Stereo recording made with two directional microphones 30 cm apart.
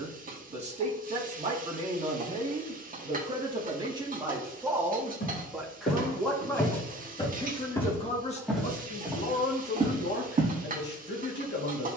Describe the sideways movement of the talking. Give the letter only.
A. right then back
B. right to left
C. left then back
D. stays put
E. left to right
B.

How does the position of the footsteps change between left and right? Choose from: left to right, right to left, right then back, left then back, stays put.
left to right.